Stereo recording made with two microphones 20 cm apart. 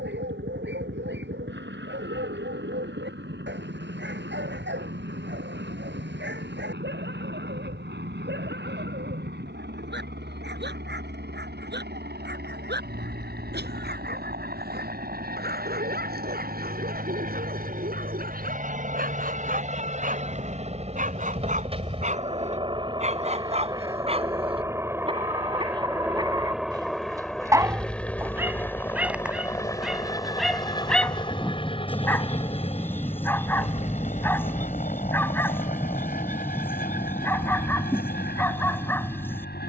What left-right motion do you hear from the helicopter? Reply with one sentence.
In this clip you hear the helicopter travel towards the left.